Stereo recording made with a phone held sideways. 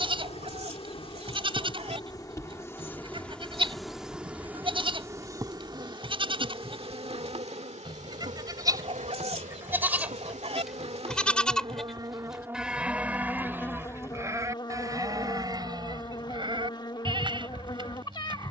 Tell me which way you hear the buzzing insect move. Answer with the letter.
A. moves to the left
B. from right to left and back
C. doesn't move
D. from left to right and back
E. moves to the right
D.